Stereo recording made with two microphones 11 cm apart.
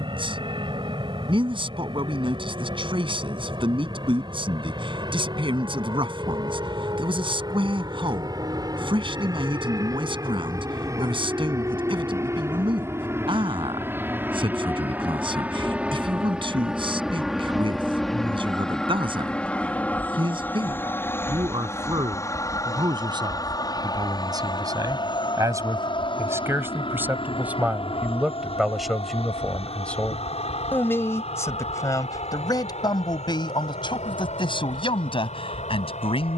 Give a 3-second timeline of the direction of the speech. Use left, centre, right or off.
right, right, right, right, right, right, right, right, right, centre, left, left.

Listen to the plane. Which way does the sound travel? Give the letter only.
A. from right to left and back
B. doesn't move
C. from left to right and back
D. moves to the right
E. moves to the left
E.